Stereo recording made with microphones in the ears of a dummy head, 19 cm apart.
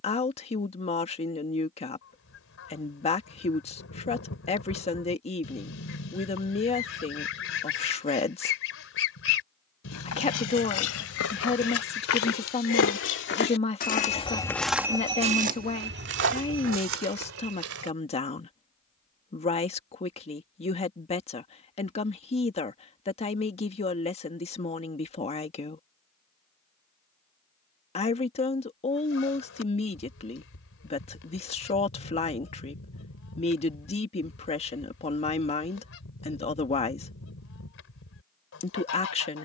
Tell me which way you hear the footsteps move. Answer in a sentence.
In this clip you hear the footsteps move from left to right.